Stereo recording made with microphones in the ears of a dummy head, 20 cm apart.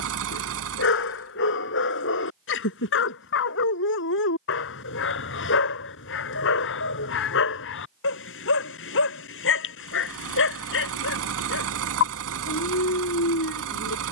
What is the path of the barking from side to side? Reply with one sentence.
You can hear the barking stay in one place.